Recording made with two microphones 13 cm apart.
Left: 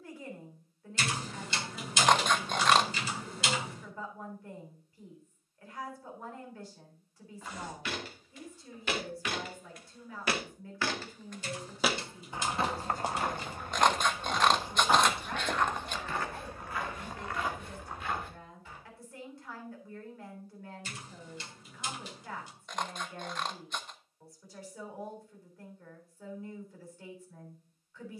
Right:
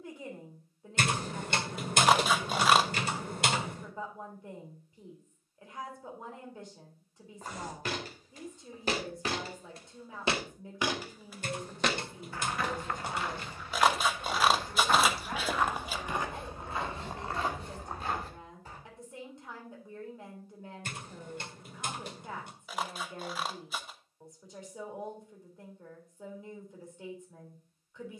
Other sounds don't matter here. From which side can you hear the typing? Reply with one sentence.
In this clip you hear the typing on the right.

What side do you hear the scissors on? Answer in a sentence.
You can hear the scissors in the centre.